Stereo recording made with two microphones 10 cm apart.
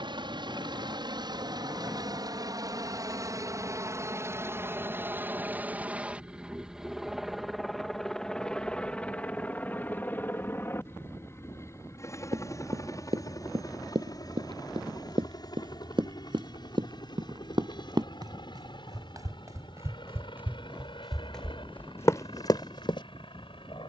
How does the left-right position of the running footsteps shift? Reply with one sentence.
You can hear the running footsteps go from the right side to the left.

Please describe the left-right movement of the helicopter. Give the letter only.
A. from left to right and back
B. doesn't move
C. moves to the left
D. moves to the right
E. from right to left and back
C.